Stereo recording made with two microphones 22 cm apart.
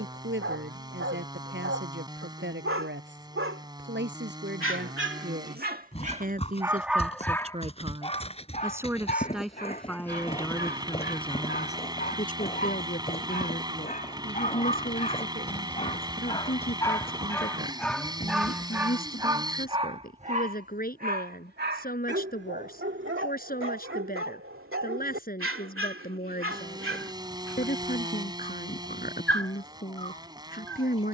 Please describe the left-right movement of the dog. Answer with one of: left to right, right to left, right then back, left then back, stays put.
left then back.